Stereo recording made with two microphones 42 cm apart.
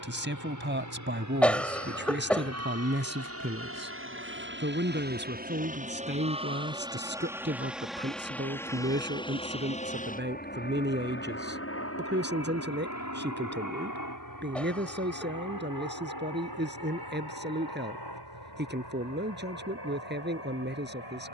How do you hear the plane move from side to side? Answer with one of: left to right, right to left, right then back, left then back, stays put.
right to left.